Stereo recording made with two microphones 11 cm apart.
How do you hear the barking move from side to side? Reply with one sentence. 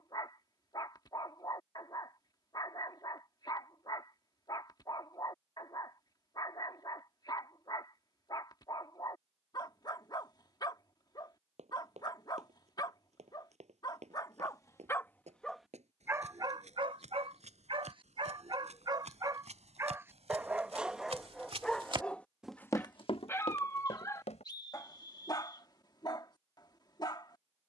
In this clip you hear the barking move from left to right and back again.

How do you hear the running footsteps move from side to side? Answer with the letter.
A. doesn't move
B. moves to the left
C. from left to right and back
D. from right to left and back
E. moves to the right
B.